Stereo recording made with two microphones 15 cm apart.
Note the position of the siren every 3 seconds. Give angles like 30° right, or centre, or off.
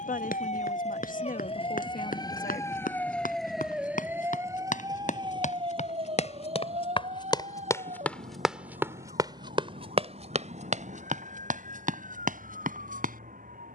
40° left, 20° right, 50° right, 60° right, 70° right.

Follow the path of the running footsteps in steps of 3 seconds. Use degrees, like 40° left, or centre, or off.
70° left, 60° left, 20° left, 50° right, 70° right.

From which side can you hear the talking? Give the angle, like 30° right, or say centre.
70° left.